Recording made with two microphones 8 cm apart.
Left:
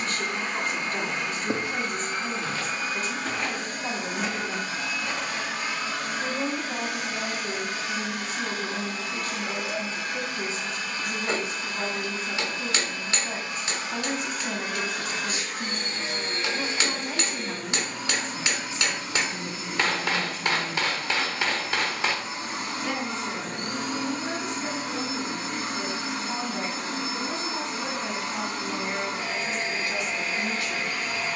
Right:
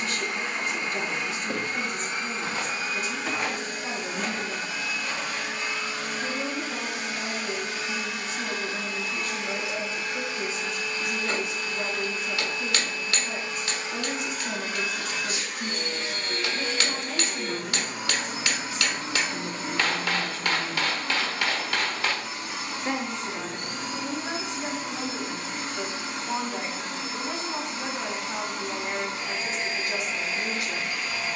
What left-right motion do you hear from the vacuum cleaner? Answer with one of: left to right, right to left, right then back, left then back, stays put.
right then back.